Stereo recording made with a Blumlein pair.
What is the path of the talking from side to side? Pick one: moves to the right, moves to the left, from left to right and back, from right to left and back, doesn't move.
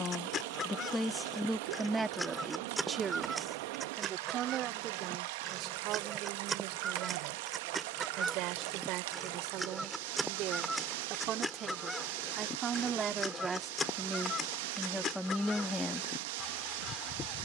from left to right and back.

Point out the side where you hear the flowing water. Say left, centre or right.
right.